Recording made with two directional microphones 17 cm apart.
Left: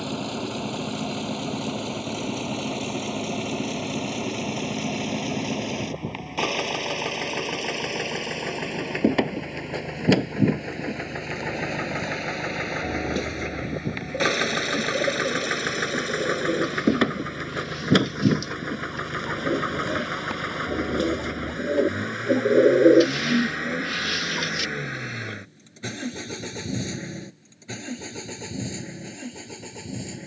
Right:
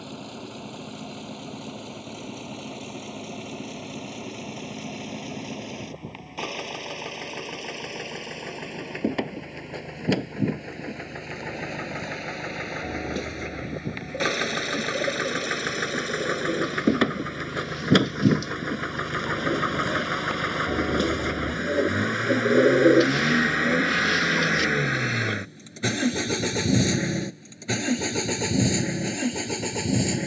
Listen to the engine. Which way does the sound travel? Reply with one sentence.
You can hear the engine move to the right.